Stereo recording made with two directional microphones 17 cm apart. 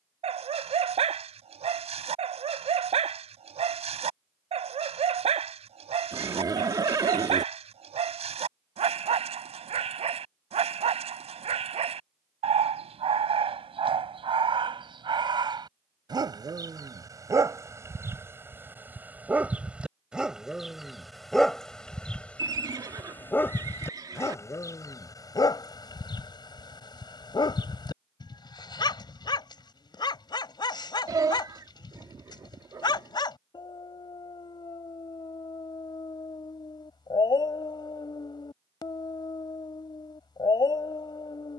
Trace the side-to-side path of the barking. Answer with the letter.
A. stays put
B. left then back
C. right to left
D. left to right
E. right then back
C.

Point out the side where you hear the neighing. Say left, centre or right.
right.